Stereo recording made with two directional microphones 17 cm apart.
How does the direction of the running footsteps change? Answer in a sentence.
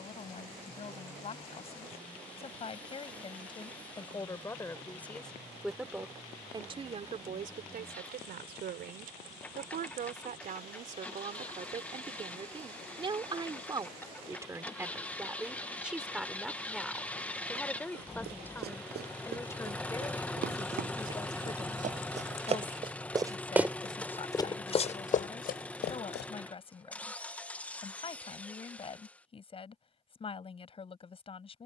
You can hear the running footsteps go from the right side to the left.